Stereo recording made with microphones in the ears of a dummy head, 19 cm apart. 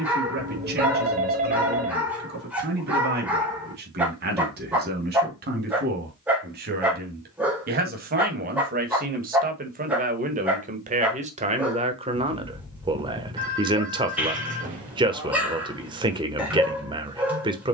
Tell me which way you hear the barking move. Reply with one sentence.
You can hear the barking stay put.